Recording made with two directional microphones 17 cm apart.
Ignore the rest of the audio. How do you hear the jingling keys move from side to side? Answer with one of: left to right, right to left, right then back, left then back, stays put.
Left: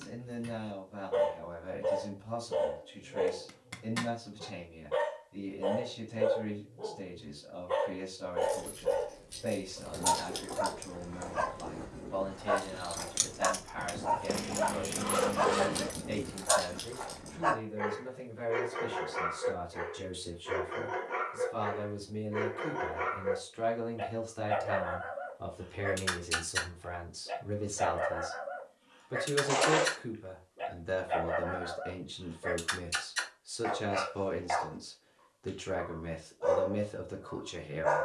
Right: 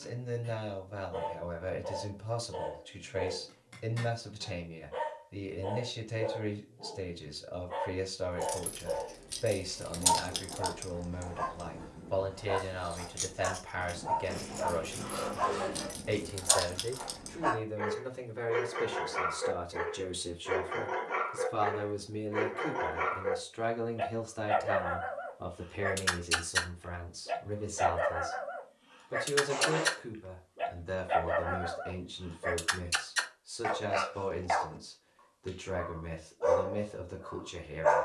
left then back.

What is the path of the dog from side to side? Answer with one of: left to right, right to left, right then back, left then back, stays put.
left to right.